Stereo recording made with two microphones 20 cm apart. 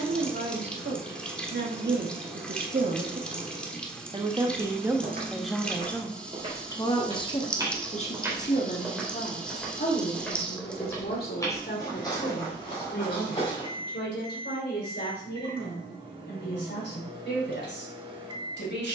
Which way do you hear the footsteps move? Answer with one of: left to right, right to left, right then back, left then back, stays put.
right to left.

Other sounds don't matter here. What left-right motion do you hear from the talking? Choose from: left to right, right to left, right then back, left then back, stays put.
right to left.